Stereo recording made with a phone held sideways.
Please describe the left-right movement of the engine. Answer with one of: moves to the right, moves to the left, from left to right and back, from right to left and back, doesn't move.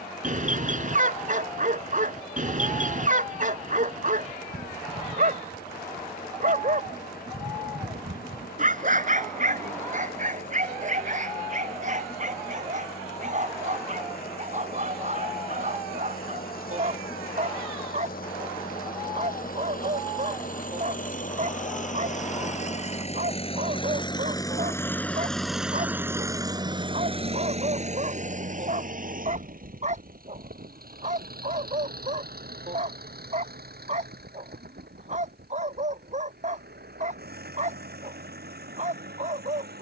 moves to the right.